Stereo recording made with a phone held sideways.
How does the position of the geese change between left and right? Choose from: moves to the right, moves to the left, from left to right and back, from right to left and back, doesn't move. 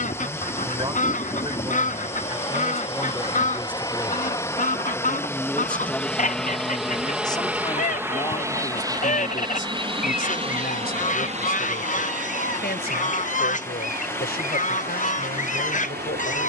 doesn't move.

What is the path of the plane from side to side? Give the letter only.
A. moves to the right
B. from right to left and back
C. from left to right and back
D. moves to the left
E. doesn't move
A.